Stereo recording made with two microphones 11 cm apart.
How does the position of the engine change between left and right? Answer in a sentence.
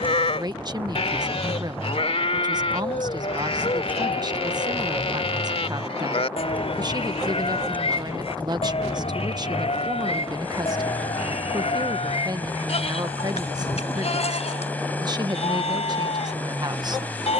You can hear the engine stay in one place.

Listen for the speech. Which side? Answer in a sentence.
In this clip you hear the speech on the right.